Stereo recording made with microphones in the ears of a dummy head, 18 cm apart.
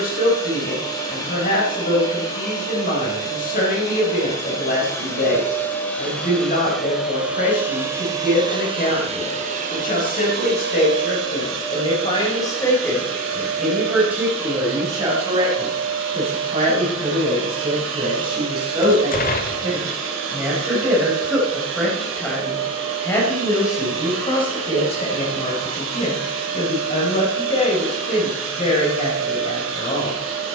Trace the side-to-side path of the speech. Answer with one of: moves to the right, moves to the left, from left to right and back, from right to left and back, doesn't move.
from left to right and back.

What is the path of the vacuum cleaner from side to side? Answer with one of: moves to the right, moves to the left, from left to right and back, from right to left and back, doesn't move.
moves to the right.